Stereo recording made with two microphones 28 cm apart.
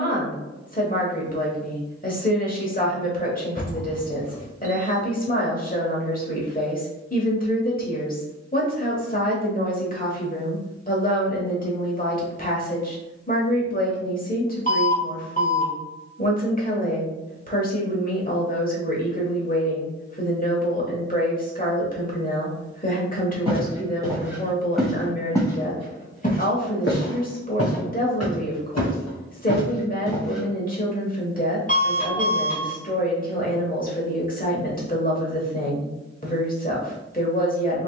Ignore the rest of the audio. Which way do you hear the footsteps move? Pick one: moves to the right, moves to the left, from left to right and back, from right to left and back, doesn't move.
from right to left and back.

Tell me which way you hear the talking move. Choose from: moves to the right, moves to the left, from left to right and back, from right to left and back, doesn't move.
doesn't move.